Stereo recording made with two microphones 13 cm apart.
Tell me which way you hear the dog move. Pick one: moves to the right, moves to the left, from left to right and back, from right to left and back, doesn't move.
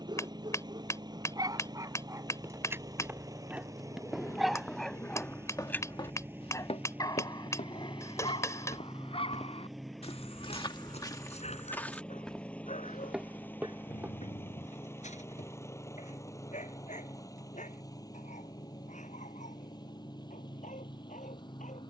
moves to the left.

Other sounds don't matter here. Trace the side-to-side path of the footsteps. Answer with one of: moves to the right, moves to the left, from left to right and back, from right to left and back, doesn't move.
from right to left and back.